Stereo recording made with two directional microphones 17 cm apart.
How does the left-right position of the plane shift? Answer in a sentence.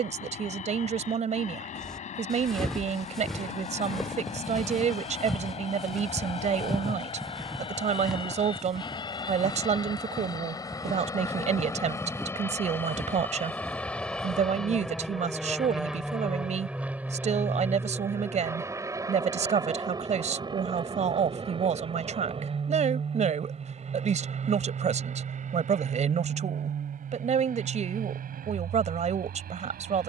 You can hear the plane move to the right.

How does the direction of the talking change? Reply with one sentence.
You can hear the talking stay put.